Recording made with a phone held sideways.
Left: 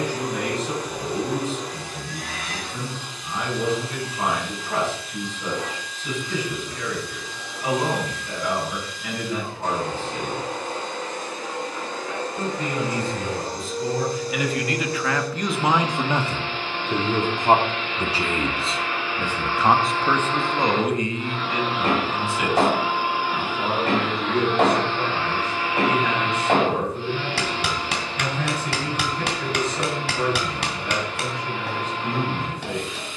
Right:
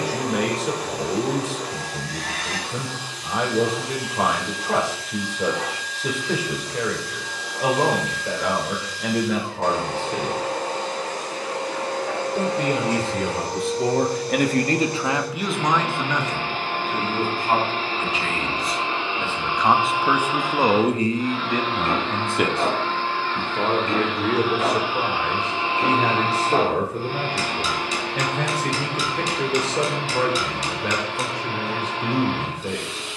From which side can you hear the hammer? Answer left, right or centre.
left.